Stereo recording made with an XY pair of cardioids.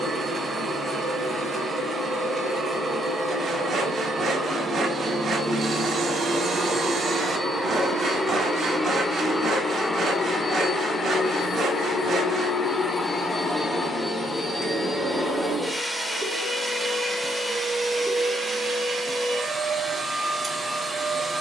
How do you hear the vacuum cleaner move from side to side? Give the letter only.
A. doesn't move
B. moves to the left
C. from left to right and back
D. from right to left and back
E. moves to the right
D.